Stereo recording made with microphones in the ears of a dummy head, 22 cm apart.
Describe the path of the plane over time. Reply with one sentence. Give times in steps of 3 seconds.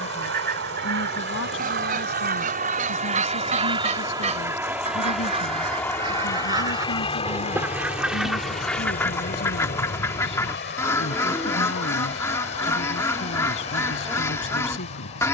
In this clip you hear the plane on the right from 0 s, in the centre from 3 s and on the left from 6 s.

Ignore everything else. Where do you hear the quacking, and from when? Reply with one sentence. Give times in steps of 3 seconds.
In this clip you hear the quacking on the right from 0 s and in the centre from 6 s.